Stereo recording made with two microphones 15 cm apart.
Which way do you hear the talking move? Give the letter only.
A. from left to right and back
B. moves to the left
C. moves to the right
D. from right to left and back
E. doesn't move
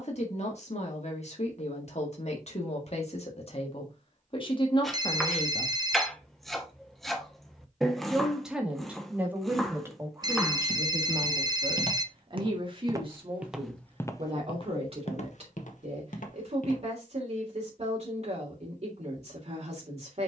C.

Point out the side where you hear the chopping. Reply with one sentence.
In this clip you hear the chopping in the centre.